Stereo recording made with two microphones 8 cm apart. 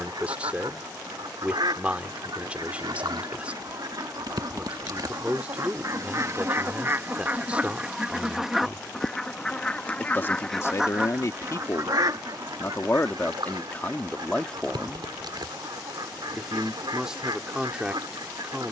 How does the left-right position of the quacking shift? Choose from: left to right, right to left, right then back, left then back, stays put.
left then back.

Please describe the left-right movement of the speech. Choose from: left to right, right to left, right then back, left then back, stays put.
left then back.